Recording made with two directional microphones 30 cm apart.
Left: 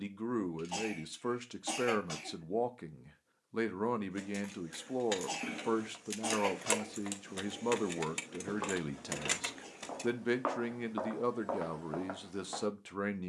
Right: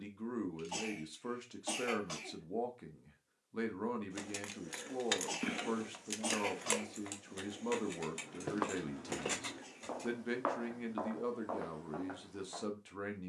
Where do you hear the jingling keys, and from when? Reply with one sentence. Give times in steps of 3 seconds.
You can hear the jingling keys not at all from 0 s, on the right from 3 s, on the left from 6 s and not at all from 12 s.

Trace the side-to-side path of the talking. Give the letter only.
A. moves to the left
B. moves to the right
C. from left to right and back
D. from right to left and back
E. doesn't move
E.